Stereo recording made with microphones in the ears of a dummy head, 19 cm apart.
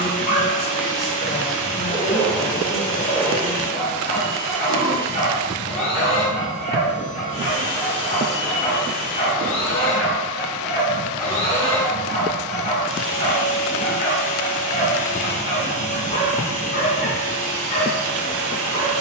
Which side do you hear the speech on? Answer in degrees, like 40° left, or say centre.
40° left.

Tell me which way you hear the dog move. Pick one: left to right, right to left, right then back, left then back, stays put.
stays put.